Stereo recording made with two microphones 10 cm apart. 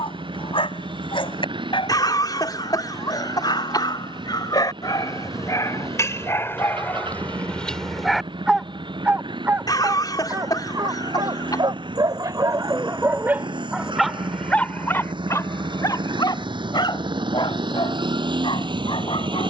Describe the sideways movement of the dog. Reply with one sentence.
In this clip you hear the dog go right and come back.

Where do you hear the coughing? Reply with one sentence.
In this clip you hear the coughing on the left.